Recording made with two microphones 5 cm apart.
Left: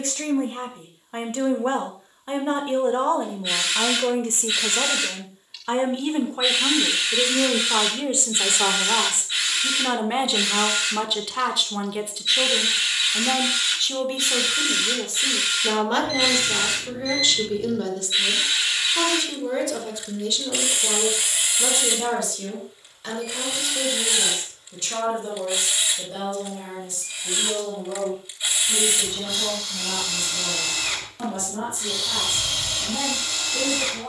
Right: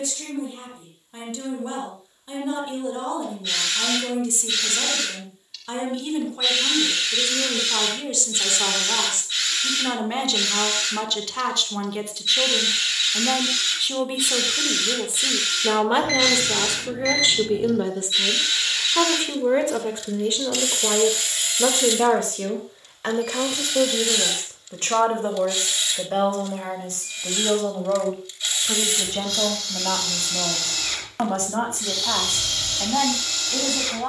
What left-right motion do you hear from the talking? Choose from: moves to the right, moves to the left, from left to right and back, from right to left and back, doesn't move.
moves to the right.